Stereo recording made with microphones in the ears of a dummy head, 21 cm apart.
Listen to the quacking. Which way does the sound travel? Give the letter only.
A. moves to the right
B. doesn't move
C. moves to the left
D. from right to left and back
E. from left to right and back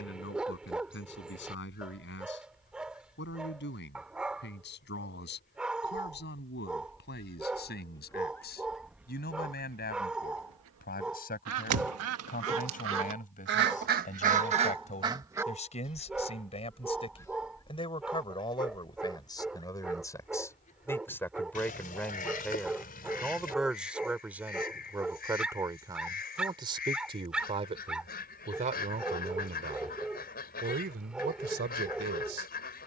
E.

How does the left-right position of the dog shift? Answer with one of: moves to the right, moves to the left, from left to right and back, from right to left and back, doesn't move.
doesn't move.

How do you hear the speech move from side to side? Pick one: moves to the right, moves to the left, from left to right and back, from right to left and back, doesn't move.
moves to the right.